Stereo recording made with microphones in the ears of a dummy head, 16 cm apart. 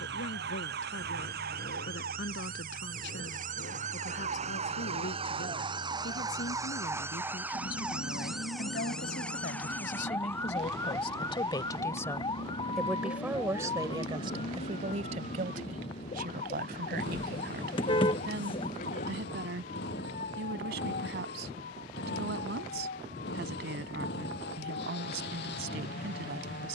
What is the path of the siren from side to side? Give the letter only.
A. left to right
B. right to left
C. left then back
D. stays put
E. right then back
B.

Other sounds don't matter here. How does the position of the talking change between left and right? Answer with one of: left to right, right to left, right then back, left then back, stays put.
left to right.